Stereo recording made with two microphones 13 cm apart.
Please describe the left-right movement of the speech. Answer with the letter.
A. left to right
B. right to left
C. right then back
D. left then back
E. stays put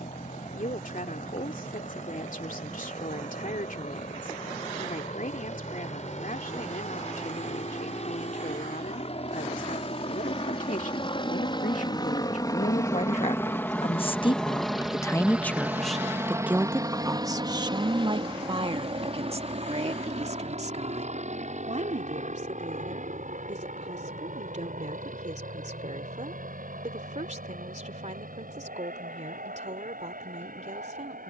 A.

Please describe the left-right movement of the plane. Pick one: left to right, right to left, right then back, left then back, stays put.
left to right.